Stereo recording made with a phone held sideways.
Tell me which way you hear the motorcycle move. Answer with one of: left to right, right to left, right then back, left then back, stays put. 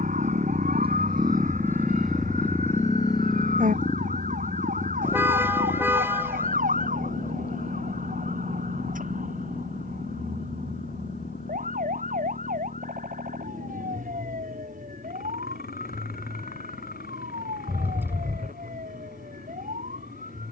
right to left.